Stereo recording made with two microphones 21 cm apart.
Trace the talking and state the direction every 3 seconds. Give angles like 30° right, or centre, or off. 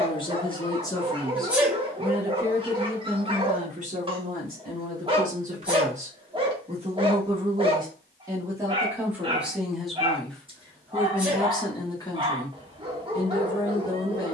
centre, 40° right, 20° right, 10° left, 20° left.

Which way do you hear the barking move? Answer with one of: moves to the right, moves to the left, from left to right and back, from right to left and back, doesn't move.
doesn't move.